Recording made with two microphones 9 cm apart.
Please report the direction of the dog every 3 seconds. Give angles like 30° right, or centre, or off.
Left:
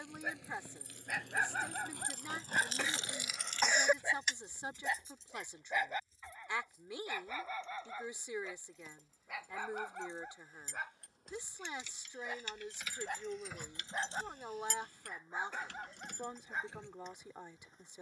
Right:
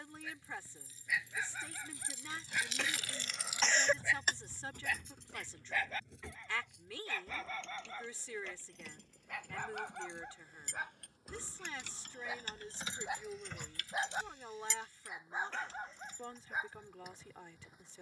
50° left, 30° left, 10° left, centre, 10° right, 10° right.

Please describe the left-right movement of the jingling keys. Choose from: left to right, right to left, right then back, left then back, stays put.
right then back.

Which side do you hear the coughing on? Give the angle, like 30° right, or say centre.
10° left.